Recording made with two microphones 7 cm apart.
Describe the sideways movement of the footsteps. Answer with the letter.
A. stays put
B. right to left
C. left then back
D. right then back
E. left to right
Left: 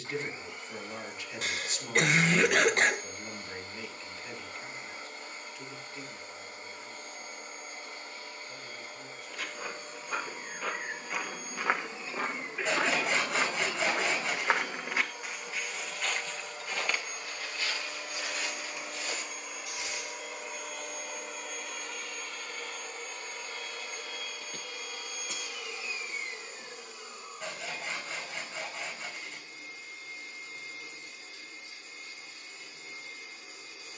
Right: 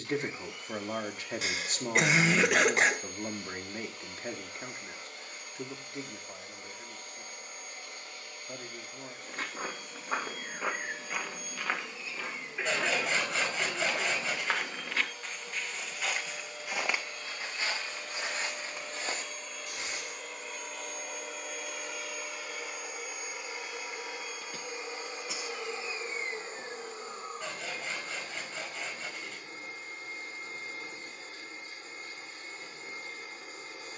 C.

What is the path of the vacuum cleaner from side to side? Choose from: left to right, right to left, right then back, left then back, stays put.
left to right.